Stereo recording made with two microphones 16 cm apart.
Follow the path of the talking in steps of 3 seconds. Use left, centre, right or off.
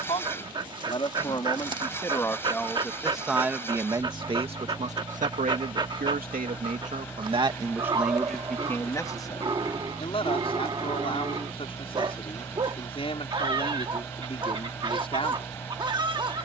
left, right, right, left, left, left.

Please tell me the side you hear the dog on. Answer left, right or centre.
right.